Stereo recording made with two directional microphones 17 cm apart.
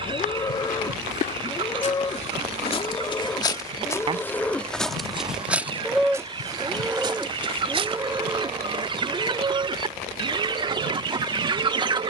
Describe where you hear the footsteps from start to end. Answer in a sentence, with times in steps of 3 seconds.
You can hear the footsteps on the left from 0 s, in the centre from 3 s, on the right from 6 s and not at all from 9 s.